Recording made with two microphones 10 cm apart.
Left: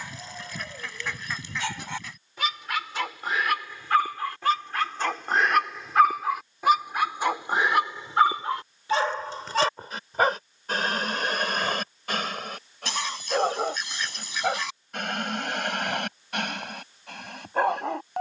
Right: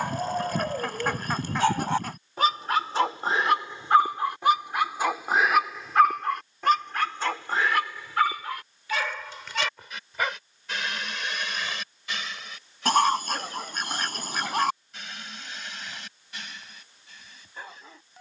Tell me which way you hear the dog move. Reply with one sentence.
You can hear the dog move to the left.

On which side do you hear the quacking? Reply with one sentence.
In this clip you hear the quacking on the right.